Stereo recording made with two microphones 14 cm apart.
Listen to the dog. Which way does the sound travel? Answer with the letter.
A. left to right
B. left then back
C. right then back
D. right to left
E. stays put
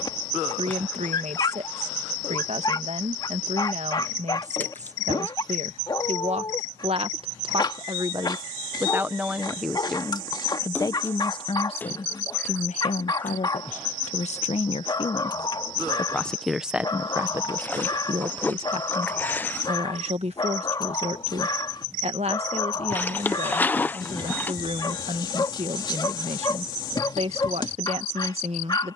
E.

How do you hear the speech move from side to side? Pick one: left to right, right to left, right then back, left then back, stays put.
left then back.